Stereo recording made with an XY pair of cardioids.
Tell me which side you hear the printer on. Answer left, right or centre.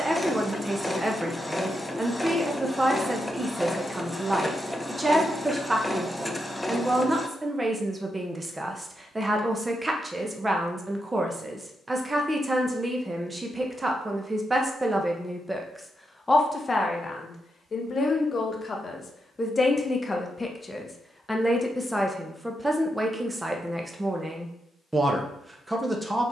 centre.